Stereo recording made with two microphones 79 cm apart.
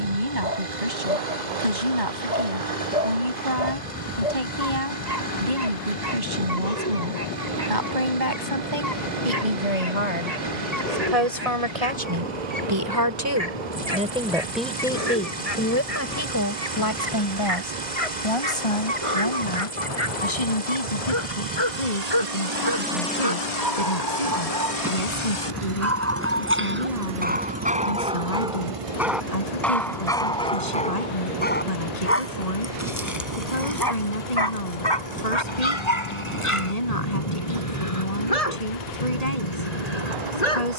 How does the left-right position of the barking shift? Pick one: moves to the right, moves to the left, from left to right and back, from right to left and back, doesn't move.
moves to the left.